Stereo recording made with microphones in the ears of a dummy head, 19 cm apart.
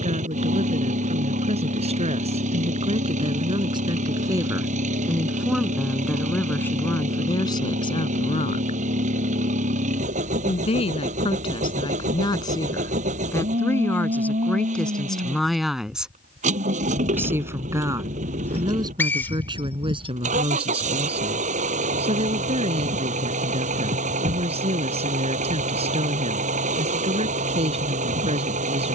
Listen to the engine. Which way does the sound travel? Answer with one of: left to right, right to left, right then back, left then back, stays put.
stays put.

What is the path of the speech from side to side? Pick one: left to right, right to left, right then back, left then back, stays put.
left then back.